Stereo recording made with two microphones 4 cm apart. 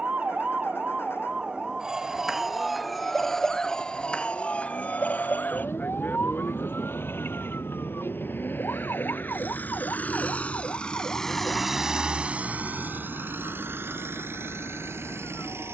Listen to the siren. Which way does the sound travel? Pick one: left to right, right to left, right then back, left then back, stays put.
right to left.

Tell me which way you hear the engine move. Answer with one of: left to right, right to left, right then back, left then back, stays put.
left to right.